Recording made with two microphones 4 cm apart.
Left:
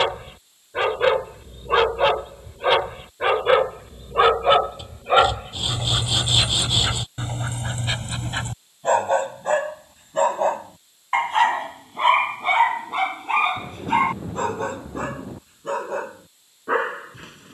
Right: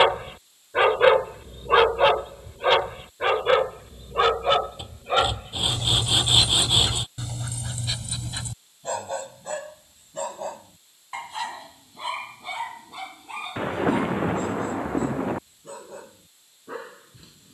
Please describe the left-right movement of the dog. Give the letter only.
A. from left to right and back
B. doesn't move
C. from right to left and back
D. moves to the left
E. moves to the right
D.